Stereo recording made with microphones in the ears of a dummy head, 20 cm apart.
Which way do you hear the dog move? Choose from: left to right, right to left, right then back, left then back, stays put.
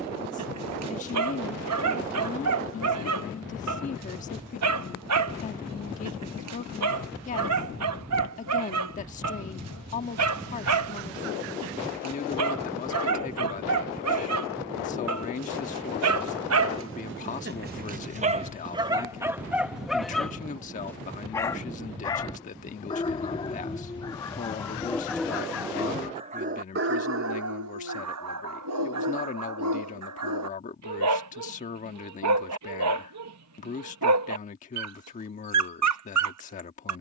left then back.